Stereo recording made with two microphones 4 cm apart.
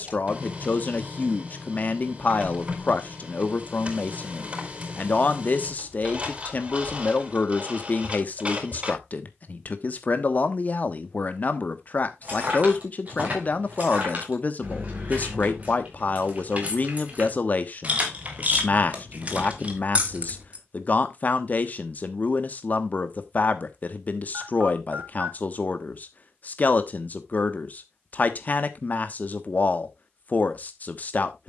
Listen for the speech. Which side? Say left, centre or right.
left.